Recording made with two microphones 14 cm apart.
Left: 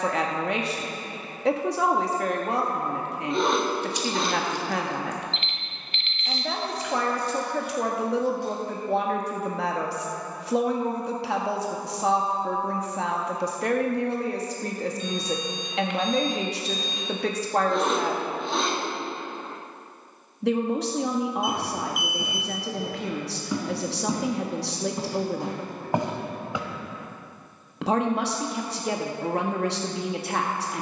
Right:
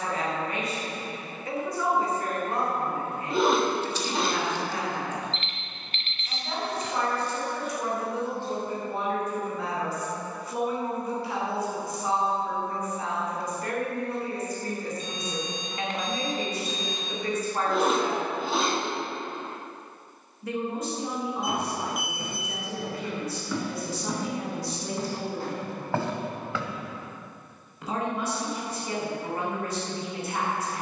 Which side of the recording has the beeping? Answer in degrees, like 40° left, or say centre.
40° right.